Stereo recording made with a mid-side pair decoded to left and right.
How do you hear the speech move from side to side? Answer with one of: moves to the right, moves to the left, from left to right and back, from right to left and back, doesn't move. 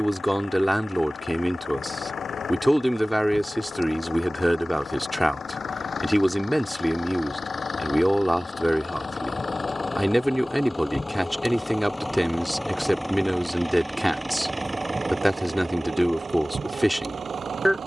doesn't move.